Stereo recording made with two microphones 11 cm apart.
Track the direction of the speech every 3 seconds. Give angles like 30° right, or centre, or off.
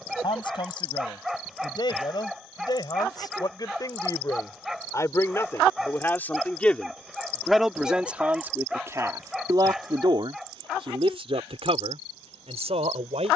50° left, 30° left, centre, 50° right, 80° right.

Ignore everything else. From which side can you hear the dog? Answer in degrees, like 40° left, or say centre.
centre.